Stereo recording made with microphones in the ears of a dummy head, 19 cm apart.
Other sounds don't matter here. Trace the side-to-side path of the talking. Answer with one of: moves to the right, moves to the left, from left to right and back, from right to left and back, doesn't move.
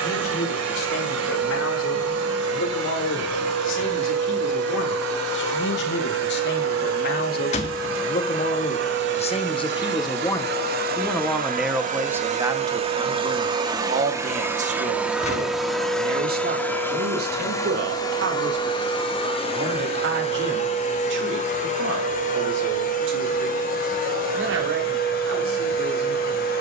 moves to the right.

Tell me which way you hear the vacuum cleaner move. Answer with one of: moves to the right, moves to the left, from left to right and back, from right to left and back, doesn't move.
moves to the left.